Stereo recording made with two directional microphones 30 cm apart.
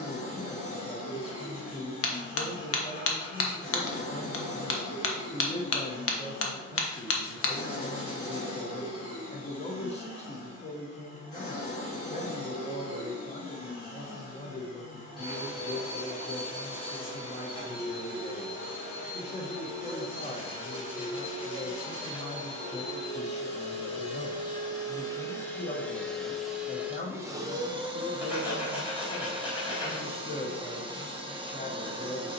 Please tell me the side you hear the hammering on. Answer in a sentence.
You can hear the hammering on the left.